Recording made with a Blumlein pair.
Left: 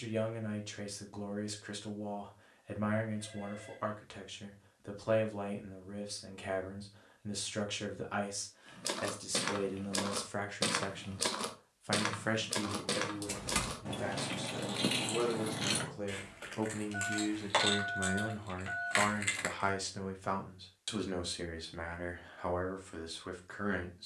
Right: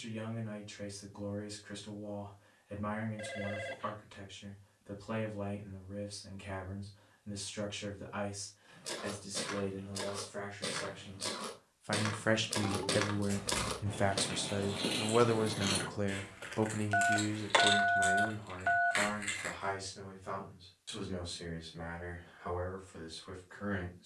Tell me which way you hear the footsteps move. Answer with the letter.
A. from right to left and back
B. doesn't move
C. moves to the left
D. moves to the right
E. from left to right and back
D.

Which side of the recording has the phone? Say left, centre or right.
right.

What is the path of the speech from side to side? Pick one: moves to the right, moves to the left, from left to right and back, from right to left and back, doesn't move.
from left to right and back.